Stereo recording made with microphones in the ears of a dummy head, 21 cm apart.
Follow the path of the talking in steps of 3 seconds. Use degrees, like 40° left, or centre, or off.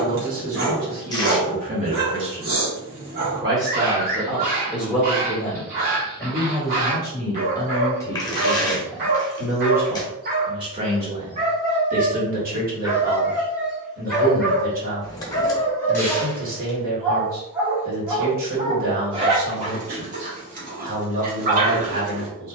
40° right, 10° right, 10° left, 20° right, 40° right, 40° right, 40° right, 40° right.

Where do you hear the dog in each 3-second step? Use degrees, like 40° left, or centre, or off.
50° right, 50° right, 50° right, 40° right, 10° right, 10° left, 30° right, 40° right.